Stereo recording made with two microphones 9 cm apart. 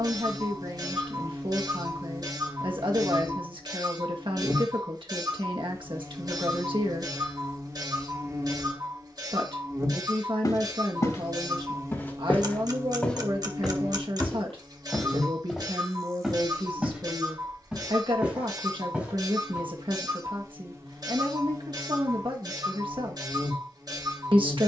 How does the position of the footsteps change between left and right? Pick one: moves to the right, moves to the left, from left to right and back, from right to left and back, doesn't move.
moves to the right.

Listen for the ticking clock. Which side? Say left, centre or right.
right.